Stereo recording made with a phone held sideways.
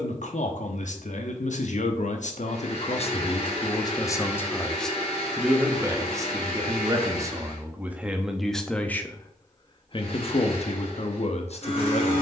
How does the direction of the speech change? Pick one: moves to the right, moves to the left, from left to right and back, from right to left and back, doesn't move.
from left to right and back.